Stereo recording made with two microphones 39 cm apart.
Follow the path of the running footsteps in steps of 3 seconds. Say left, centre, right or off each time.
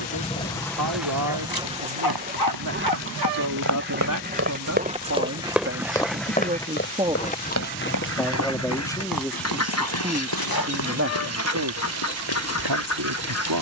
right, right, left, left, left.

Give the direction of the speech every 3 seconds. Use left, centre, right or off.
right, right, centre, right, right.